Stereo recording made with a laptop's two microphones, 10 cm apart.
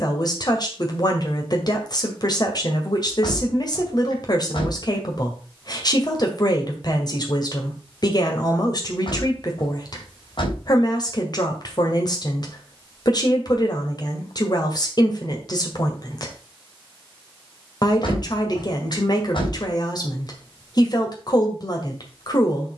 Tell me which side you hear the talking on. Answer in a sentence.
In this clip you hear the talking on the left.